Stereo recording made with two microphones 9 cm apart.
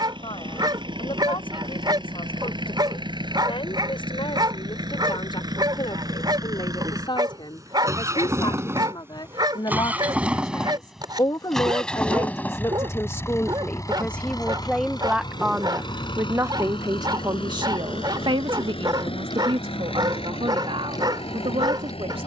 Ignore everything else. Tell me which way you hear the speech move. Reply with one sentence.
You can hear the speech go from the left side to the right.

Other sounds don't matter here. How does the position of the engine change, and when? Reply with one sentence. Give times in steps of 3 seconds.
In this clip you hear the engine on the right from 0 s, in the centre from 9 s and on the left from 12 s.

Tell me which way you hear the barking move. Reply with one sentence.
You can hear the barking stay put.